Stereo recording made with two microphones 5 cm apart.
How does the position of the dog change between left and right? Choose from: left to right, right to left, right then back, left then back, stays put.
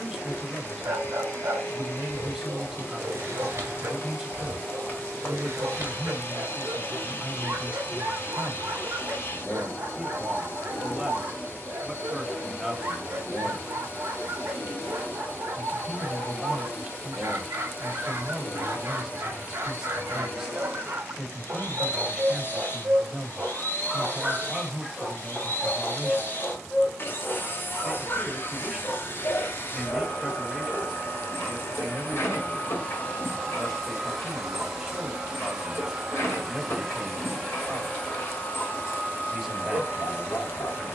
right to left.